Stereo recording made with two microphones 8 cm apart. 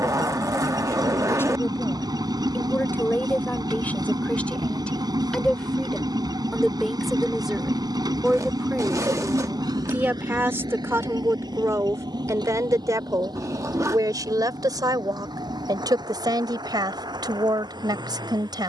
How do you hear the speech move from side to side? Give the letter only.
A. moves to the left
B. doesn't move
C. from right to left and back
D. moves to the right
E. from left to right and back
D.